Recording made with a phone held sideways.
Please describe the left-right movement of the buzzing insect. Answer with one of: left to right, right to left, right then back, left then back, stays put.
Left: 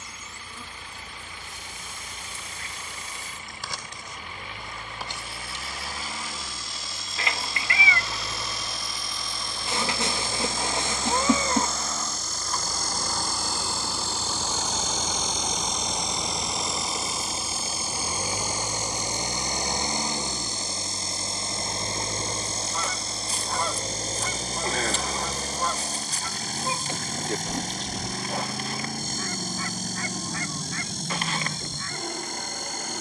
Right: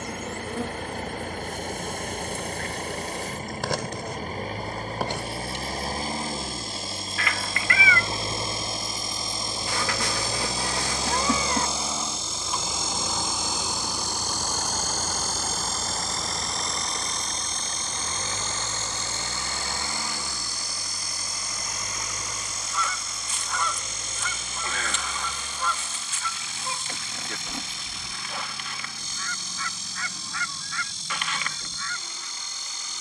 right to left.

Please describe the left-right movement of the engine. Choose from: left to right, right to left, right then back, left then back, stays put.
right to left.